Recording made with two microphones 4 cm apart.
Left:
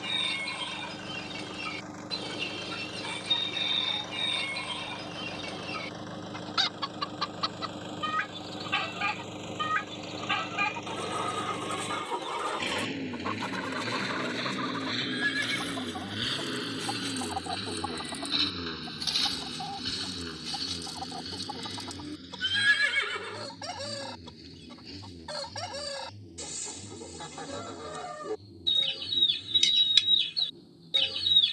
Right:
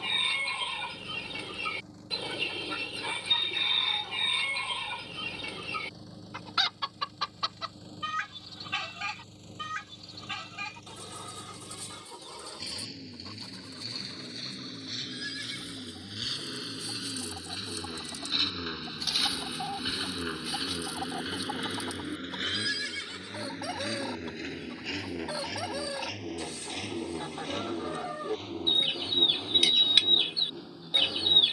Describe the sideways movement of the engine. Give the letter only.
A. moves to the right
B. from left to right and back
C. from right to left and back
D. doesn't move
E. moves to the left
A.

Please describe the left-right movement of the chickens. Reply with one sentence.
You can hear the chickens move from right to left and back again.